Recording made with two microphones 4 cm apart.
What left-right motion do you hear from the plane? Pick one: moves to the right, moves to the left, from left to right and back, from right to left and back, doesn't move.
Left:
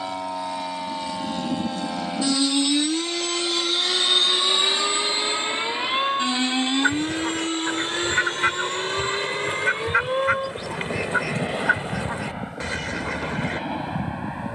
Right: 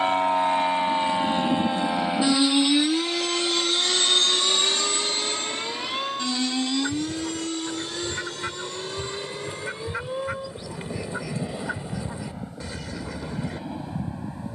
moves to the left.